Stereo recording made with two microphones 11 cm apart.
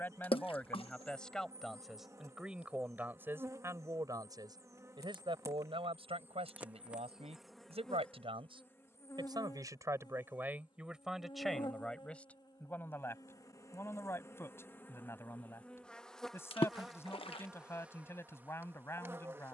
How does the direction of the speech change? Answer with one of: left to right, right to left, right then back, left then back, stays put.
right then back.